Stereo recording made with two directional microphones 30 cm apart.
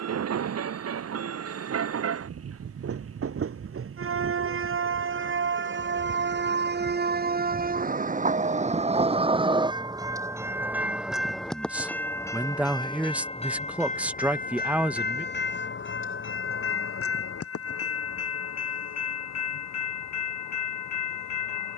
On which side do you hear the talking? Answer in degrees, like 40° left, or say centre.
centre.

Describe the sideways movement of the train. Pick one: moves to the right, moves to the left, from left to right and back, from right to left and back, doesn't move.
moves to the left.